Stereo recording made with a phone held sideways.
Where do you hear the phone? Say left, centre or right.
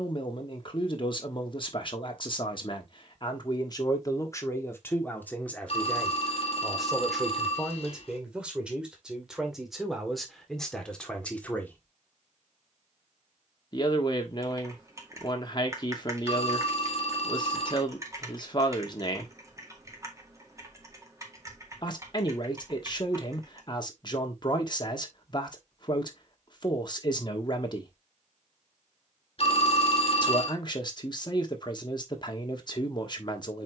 left.